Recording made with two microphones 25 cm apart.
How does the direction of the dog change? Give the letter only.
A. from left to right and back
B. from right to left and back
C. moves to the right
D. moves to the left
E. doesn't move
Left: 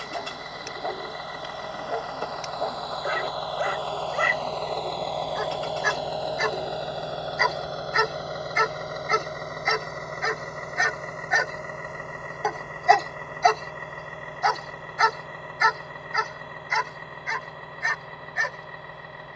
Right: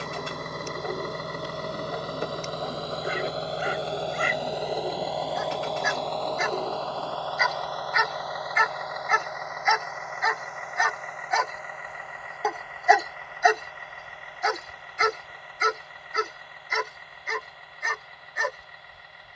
C.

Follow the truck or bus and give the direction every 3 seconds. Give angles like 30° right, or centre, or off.
50° right, 10° right, 20° left, 40° left, 50° left, 60° left, 60° left.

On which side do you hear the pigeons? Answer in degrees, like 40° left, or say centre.
20° right.